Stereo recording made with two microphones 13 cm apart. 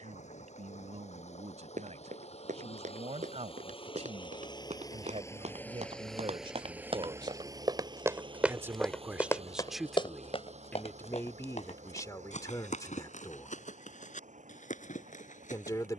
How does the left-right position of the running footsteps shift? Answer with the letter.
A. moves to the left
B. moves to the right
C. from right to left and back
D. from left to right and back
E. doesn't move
A.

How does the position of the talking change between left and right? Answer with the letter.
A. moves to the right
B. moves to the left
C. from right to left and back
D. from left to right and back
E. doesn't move
B.